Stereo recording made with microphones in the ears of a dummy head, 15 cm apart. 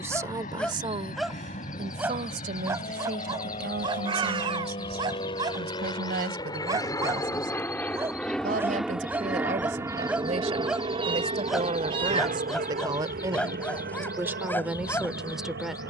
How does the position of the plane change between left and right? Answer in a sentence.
You can hear the plane move to the right.